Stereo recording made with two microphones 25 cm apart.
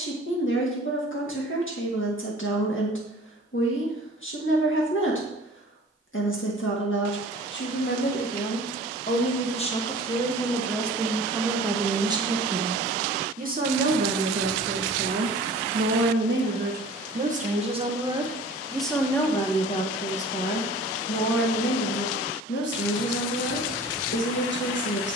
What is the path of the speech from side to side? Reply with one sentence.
You can hear the speech go right and come back.